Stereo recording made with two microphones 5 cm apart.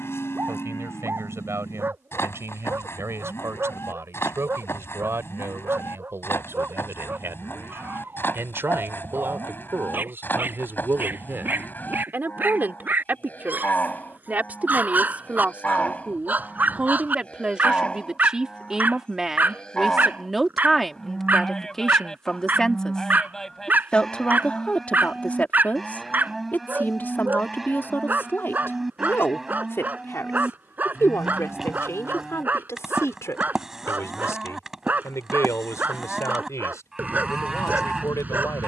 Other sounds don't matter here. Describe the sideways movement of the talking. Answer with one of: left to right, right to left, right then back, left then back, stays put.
right to left.